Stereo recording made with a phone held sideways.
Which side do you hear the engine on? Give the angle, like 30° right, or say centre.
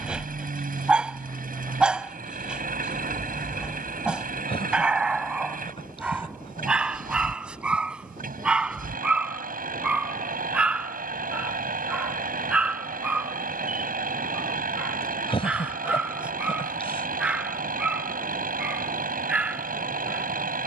80° right.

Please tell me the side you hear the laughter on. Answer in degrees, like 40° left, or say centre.
40° left.